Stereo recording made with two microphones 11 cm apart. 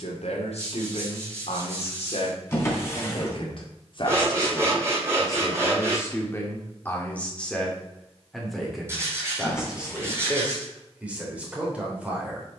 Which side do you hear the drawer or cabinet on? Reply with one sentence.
In this clip you hear the drawer or cabinet on the left.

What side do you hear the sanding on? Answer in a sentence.
You can hear the sanding on the right.